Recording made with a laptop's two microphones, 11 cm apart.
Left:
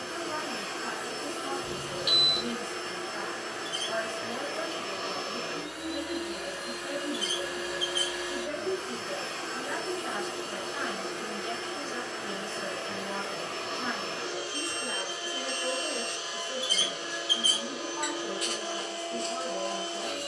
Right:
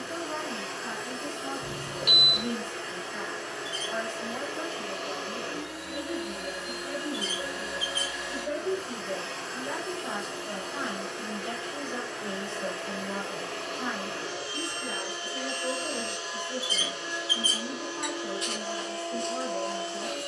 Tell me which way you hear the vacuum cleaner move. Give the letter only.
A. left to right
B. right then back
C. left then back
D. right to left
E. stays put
E.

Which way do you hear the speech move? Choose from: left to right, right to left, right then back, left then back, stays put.
right then back.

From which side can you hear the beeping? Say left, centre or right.
right.